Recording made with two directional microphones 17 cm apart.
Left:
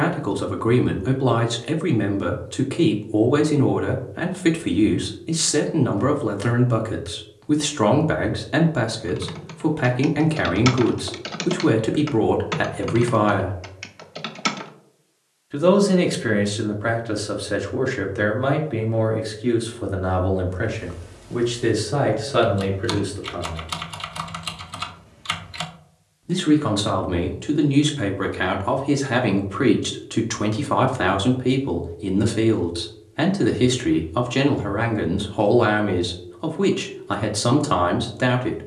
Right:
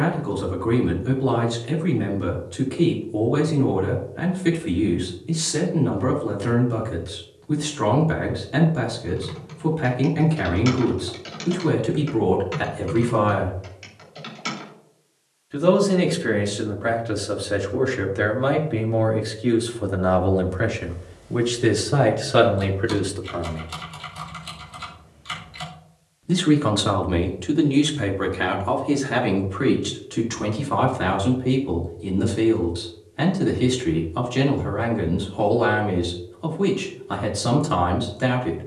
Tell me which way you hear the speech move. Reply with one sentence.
You can hear the speech move from left to right and back again.